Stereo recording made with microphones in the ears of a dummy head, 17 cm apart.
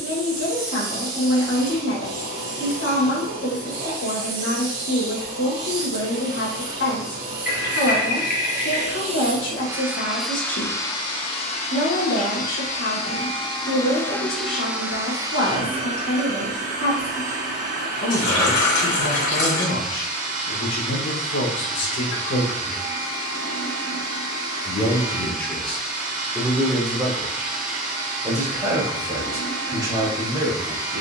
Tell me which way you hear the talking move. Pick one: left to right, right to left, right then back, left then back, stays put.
left to right.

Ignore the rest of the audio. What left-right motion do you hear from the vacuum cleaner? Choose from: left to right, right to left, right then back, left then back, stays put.
left then back.